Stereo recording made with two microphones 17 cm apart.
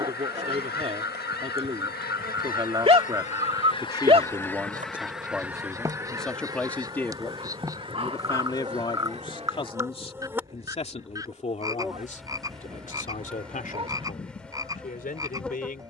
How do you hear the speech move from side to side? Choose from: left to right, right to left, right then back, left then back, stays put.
right to left.